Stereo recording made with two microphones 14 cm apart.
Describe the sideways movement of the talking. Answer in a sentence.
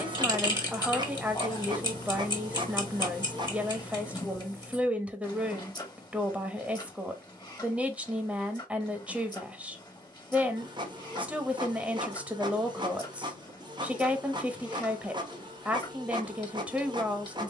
In this clip you hear the talking stay put.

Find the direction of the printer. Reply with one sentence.
In this clip you hear the printer on the right.